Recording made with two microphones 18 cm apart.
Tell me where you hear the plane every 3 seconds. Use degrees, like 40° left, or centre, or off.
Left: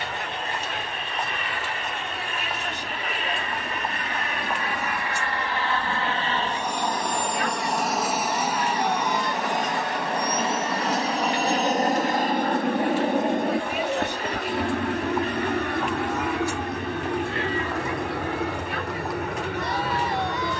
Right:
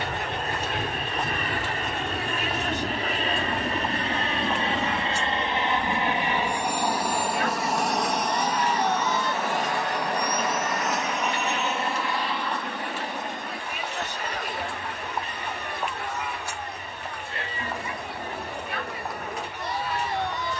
40° right, 30° right, centre, 30° left, 50° left, 60° left, 70° left.